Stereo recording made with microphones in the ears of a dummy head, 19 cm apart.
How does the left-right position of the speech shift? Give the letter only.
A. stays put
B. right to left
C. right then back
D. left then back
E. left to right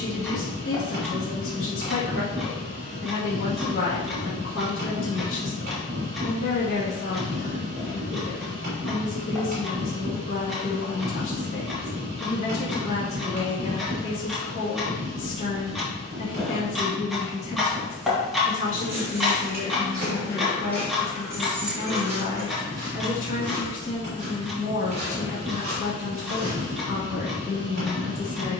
A.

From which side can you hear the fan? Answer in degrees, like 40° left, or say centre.
30° right.